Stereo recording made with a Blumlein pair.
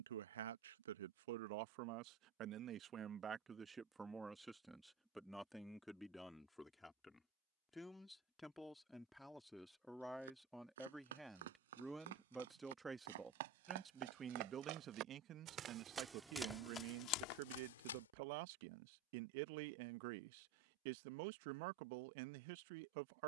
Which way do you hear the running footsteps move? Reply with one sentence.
In this clip you hear the running footsteps move to the left.